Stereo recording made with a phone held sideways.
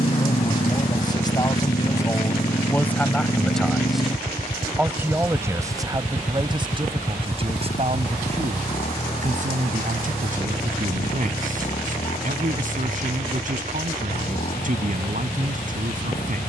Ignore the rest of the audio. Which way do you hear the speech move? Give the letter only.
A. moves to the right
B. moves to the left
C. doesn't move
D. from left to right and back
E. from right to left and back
A.